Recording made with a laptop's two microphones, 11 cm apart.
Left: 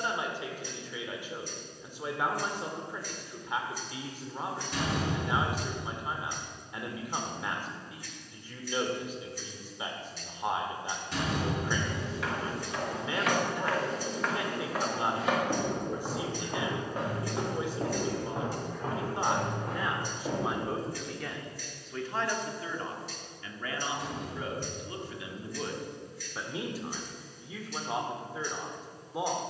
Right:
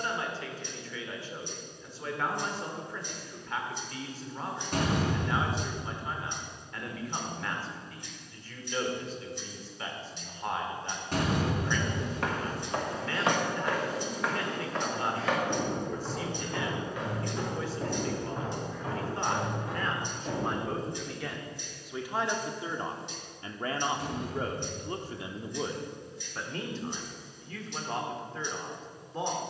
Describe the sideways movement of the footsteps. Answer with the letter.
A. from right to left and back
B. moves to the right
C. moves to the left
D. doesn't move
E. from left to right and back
C.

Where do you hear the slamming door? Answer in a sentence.
You can hear the slamming door on the right.